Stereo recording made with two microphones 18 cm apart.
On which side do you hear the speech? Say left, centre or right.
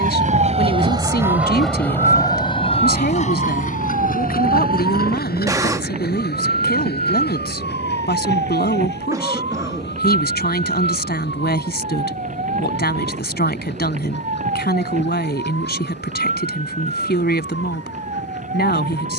left.